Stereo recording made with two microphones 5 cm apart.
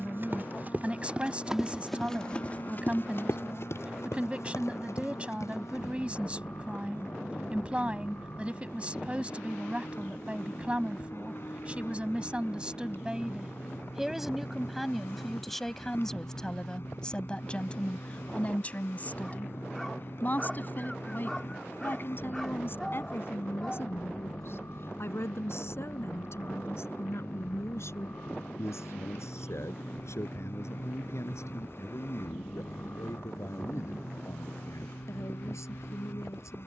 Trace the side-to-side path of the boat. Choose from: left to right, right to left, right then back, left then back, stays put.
stays put.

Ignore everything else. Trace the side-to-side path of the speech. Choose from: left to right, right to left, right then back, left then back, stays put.
right to left.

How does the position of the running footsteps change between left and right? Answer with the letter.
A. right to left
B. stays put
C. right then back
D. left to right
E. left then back
A.